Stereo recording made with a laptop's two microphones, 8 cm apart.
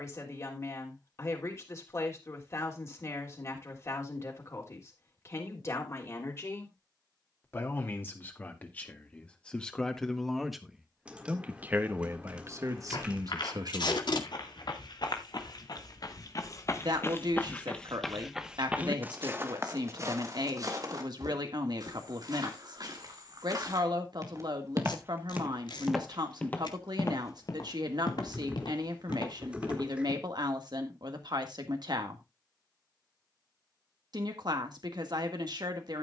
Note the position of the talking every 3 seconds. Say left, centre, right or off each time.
left, left, left, centre, right, right, right, right, right, right, right, right.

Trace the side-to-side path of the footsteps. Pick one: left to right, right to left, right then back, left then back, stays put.
right then back.